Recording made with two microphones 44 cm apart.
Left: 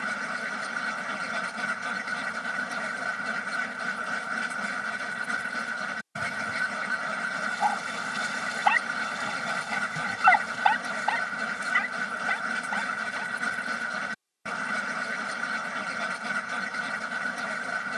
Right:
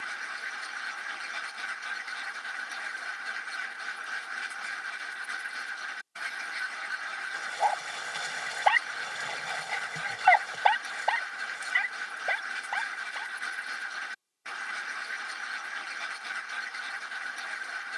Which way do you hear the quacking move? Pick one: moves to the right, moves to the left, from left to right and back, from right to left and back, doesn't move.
doesn't move.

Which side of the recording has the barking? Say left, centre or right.
left.